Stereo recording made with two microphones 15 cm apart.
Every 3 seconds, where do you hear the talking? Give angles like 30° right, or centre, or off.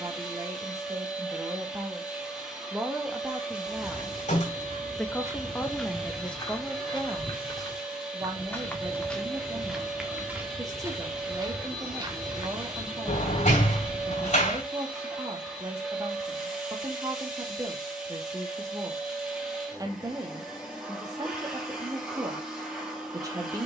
20° right, centre, 10° right, 20° right, 20° right, 20° right, 20° right, 20° right.